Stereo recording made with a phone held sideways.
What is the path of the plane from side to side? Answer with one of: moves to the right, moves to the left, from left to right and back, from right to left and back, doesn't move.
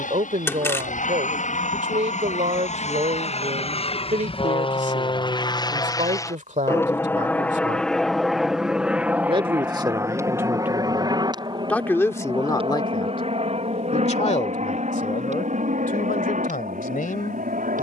moves to the right.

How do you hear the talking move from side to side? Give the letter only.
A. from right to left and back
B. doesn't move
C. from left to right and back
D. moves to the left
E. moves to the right
D.